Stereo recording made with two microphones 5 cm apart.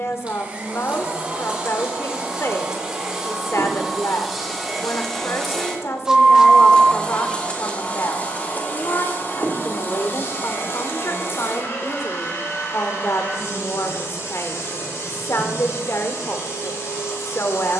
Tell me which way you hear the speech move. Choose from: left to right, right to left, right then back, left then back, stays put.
stays put.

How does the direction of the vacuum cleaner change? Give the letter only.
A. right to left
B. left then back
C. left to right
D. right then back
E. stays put
A.